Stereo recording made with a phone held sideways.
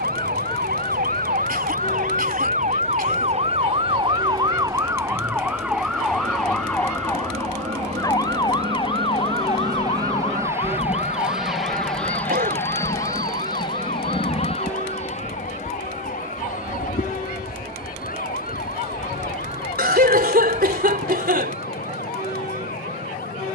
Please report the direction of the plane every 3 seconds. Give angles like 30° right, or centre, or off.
70° right, 70° right, 50° right, 20° right, 20° left, 50° left, 60° left, 60° left.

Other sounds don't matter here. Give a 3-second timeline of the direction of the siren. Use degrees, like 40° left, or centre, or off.
60° right, 20° right, 10° left, 40° left, 50° left, 50° left, 60° left, 60° left.